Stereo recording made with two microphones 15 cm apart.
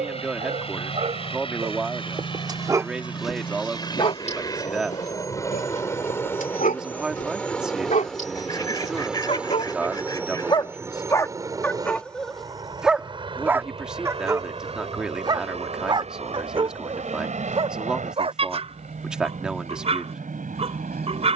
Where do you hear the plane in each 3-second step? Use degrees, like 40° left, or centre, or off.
40° left, 30° left, 10° left, 20° right, 30° right, 50° right, 60° right.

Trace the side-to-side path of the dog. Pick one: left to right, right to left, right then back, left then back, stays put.
left then back.